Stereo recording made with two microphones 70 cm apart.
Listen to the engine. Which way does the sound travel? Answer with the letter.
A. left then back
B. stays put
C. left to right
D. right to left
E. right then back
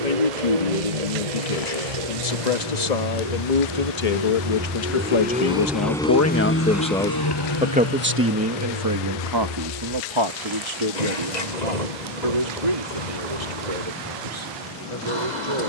D.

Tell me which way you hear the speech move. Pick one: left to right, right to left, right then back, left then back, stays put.
left to right.